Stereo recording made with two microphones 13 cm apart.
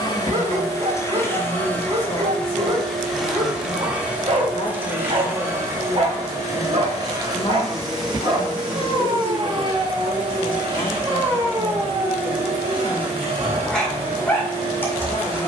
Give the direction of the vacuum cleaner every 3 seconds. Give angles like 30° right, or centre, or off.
20° left, 10° right, 30° right, 40° right, 50° right.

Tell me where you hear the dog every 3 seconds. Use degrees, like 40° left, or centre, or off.
50° right, 50° right, 50° right, 20° right, centre.